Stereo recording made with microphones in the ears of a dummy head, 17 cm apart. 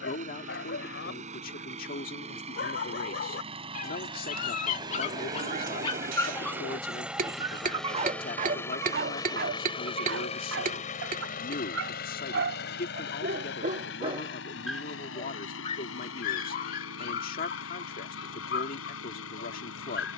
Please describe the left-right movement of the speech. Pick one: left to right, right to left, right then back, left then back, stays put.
stays put.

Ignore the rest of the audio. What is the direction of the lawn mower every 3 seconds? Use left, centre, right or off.
right, right, centre, left, left, left, left.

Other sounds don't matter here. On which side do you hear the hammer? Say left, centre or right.
right.